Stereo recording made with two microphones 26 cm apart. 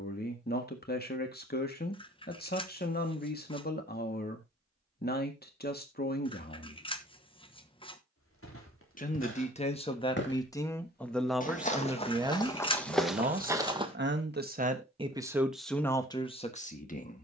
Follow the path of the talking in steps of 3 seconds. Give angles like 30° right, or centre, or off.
40° left, 40° left, 40° left, 10° left, 30° right, 10° left.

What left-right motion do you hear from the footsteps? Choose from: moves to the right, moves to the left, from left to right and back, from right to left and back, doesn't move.
moves to the right.